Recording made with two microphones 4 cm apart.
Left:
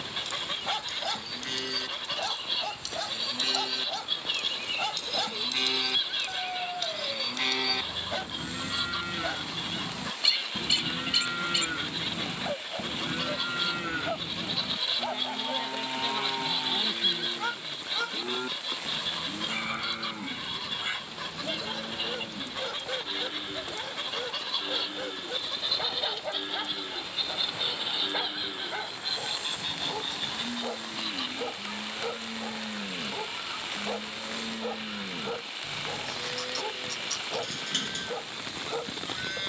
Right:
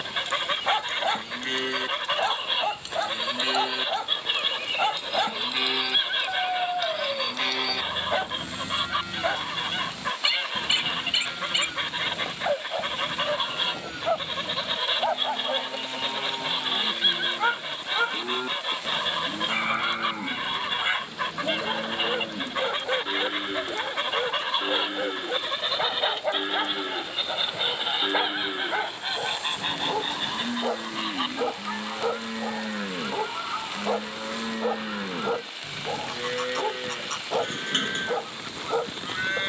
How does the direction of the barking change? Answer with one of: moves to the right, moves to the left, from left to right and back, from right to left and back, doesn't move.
doesn't move.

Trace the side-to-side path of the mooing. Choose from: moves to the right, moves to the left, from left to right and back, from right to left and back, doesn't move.
from right to left and back.